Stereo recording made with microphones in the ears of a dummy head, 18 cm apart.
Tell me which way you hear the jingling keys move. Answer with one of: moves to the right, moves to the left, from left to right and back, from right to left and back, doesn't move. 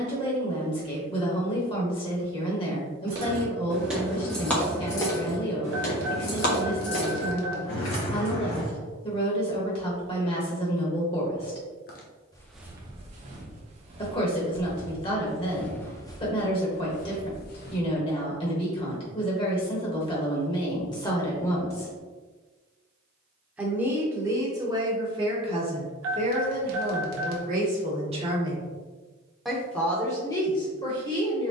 moves to the left.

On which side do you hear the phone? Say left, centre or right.
right.